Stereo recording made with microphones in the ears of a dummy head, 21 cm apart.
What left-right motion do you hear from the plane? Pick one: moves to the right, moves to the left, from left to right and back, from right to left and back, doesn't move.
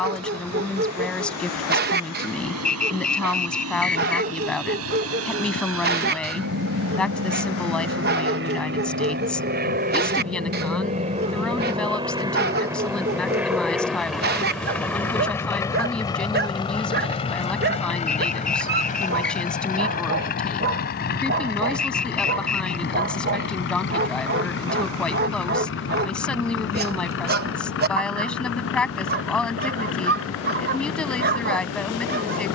moves to the left.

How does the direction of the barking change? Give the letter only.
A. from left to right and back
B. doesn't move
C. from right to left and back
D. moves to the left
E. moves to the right
B.